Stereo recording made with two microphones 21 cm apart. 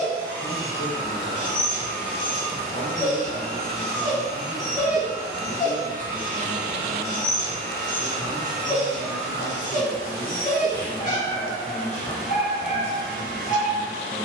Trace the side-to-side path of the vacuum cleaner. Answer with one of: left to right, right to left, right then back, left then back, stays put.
stays put.